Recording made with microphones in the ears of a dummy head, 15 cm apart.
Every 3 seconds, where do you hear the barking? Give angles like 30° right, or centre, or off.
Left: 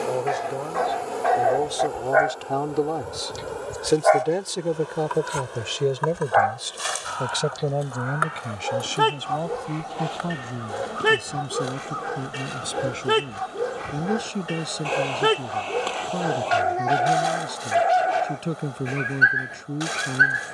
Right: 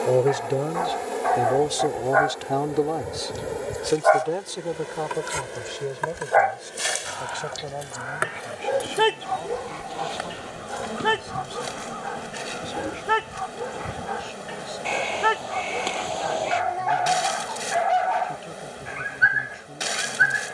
40° left, 10° left, 20° right, 20° left, 40° left, 40° left, 40° left.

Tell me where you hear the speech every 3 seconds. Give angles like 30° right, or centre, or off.
20° right, 30° left, 50° left, 60° left, 70° left, 70° left, 70° left.